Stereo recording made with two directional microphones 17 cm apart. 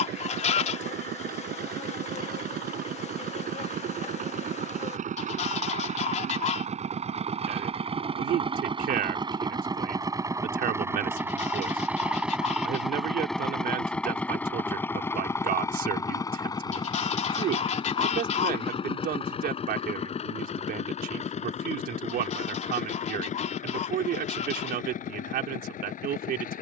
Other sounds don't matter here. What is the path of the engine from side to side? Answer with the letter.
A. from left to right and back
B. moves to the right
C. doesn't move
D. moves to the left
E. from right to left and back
D.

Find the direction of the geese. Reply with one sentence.
In this clip you hear the geese on the left.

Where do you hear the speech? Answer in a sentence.
You can hear the speech on the right.